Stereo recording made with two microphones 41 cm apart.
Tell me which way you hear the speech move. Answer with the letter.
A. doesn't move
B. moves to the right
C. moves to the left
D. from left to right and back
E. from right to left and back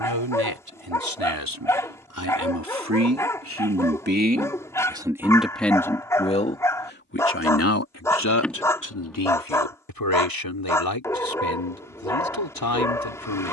C.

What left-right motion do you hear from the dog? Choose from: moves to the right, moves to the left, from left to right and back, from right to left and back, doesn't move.
doesn't move.